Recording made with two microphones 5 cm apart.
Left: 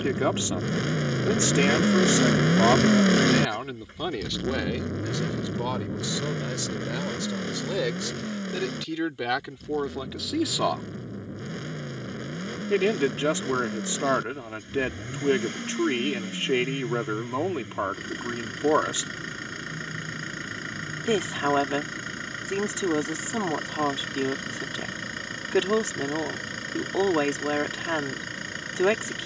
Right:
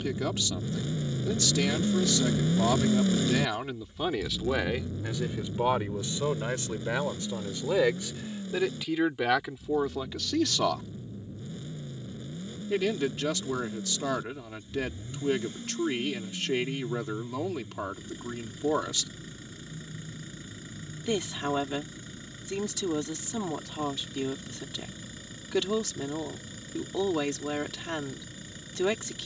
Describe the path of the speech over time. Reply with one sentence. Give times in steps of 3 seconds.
In this clip you hear the speech on the left from 0 s, in the centre from 3 s, on the right from 6 s, in the centre from 9 s and on the left from 12 s.